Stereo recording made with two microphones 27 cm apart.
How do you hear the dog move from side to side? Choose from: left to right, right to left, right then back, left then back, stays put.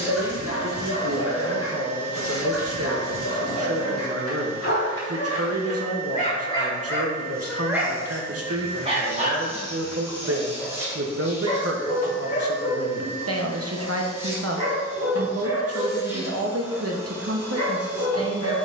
right then back.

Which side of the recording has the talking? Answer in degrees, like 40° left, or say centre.
60° right.